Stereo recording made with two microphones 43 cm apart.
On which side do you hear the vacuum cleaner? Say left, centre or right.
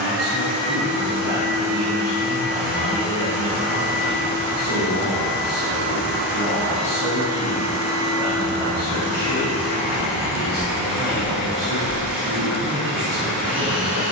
centre.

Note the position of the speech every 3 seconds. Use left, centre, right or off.
right, right, centre, centre, right.